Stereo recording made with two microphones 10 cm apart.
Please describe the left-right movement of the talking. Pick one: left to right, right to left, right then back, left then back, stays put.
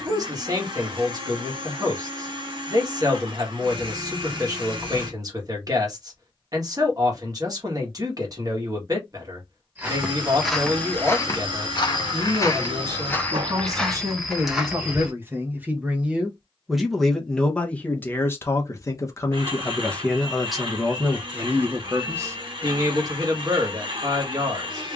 left then back.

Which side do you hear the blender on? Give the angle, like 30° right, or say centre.
60° right.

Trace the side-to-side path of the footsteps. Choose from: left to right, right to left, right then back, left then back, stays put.
left then back.